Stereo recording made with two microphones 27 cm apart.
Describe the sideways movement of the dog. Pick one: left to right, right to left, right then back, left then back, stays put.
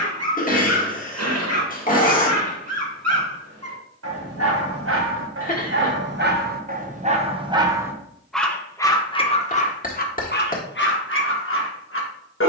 right to left.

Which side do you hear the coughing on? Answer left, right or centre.
left.